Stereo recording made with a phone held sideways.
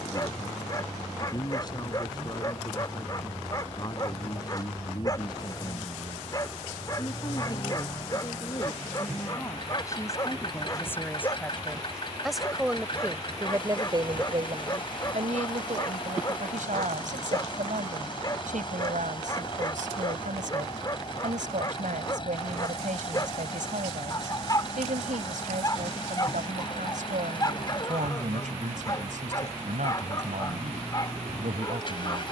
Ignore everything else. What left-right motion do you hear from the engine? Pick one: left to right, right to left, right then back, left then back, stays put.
stays put.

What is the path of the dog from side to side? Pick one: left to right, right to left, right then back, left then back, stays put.
stays put.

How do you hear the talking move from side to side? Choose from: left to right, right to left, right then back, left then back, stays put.
left to right.